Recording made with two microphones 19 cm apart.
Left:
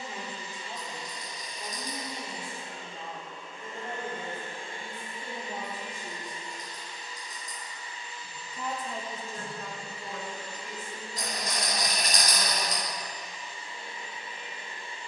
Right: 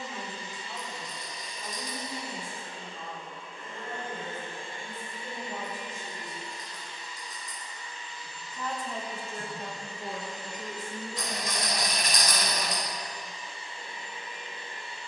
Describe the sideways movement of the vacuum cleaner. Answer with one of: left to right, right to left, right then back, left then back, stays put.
stays put.